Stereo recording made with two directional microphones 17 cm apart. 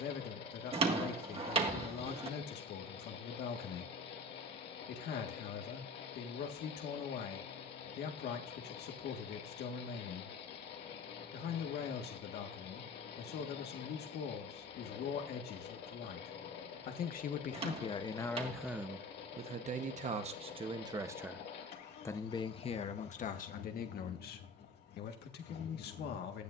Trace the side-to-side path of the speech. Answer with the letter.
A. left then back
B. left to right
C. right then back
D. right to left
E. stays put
C.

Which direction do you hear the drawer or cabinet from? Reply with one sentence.
You can hear the drawer or cabinet on the right.